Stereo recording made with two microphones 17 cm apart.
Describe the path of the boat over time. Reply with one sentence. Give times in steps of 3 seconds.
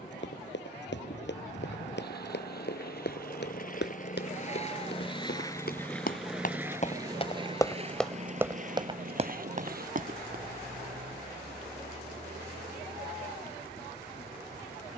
You can hear the boat on the left from 0 s and on the right from 6 s.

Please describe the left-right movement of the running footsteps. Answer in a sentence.
In this clip you hear the running footsteps go from the left side to the right.